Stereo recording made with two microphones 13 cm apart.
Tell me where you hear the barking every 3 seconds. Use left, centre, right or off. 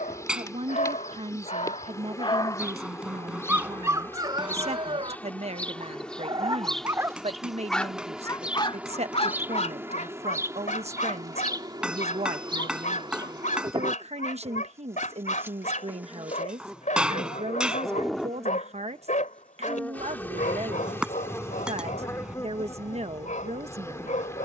left, right, centre, left, left, left, left, left.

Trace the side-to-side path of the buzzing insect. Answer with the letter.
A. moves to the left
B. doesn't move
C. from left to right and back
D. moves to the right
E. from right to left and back
C.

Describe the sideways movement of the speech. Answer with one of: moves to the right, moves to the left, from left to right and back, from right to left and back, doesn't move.
doesn't move.